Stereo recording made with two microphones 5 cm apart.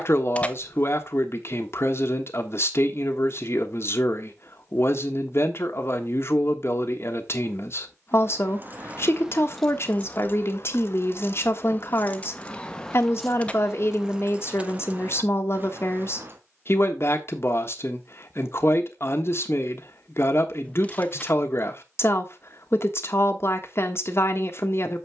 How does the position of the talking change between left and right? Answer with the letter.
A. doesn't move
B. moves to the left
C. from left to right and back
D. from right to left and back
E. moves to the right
A.